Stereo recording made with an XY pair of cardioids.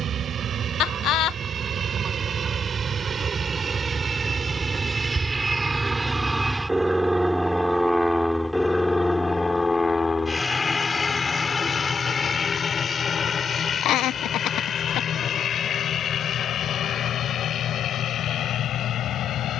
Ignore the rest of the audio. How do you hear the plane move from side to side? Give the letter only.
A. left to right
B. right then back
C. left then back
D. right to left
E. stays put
D.